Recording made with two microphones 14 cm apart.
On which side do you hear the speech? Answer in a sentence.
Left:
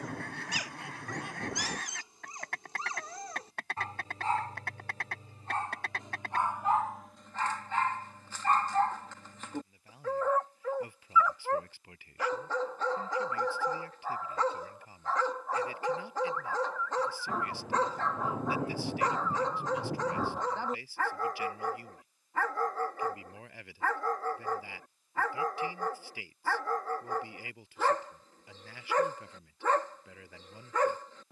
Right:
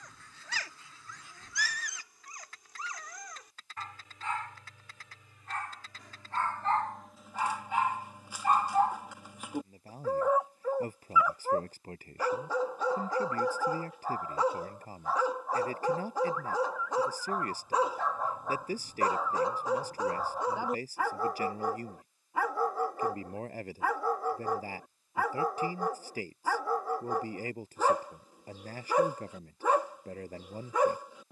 You can hear the speech on the right.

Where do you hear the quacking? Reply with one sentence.
In this clip you hear the quacking on the left.